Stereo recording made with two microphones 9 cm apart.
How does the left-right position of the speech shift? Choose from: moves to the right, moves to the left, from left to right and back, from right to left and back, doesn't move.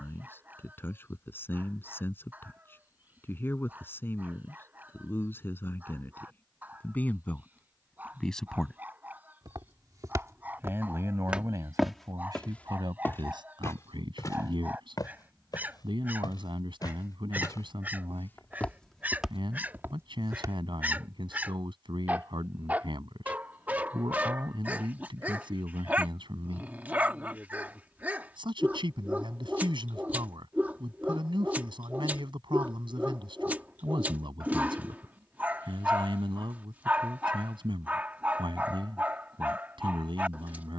moves to the right.